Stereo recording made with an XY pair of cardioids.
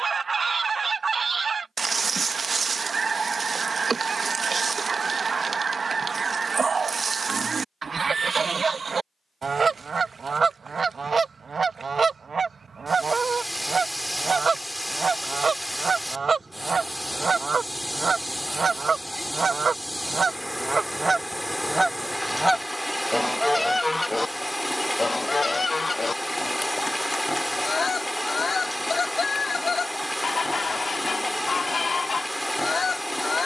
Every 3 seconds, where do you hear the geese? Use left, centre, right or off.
right, right, right, right, right, right, right, centre, left, left, left.